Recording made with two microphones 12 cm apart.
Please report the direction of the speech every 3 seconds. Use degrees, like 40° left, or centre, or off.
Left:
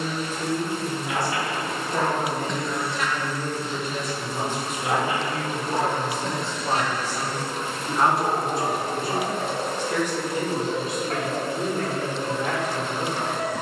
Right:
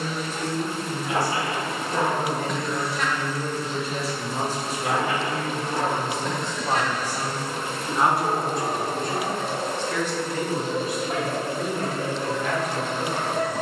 20° left, 30° right, 10° right, 20° left, 30° left.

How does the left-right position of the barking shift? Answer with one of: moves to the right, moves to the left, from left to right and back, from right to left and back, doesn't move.
from right to left and back.